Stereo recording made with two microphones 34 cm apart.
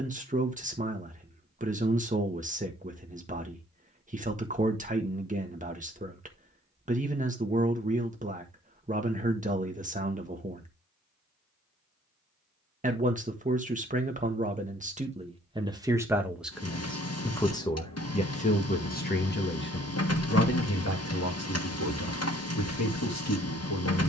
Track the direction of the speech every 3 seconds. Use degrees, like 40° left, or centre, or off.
20° right, 20° right, 20° right, 20° right, 20° right, centre, 30° left, 50° left.